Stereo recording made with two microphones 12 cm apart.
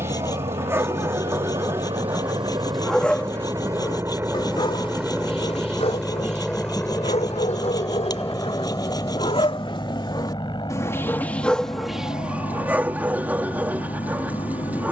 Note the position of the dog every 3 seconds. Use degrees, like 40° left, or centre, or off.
20° right, 40° left, 60° left, 30° left, 10° right.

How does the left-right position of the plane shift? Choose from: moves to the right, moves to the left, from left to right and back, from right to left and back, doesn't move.
moves to the left.